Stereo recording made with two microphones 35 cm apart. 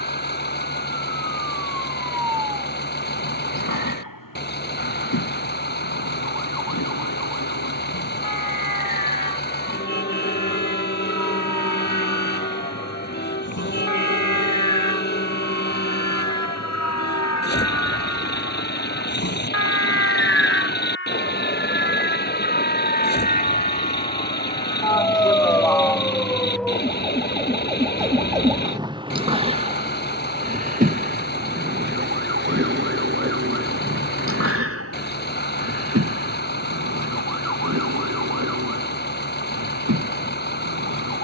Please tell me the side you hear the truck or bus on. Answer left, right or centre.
left.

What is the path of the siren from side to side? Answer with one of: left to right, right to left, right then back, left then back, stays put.
left to right.